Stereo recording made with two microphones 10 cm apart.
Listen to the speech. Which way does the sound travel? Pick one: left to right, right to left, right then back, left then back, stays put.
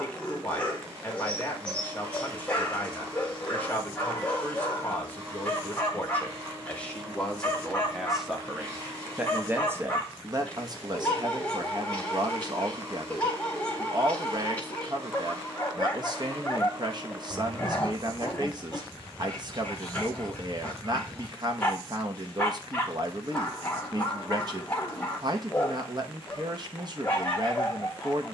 left to right.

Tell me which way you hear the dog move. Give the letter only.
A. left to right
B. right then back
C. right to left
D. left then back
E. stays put
E.